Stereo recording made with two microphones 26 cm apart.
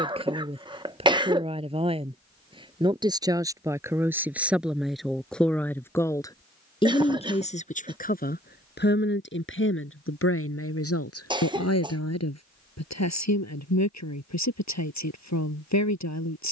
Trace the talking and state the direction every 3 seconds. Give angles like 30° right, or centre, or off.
20° right, centre, 20° left, 50° left, 70° left, 70° left.